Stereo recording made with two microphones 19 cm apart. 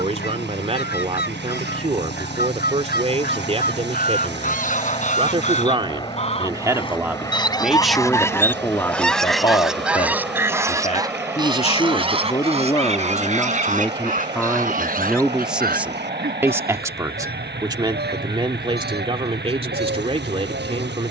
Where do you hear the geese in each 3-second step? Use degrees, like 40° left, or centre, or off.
60° left, 50° left, 20° left, 10° right, 40° right, 60° right, 70° right.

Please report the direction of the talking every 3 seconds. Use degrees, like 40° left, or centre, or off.
40° right, 30° right, centre, 30° left, 10° left, 10° right, 30° right.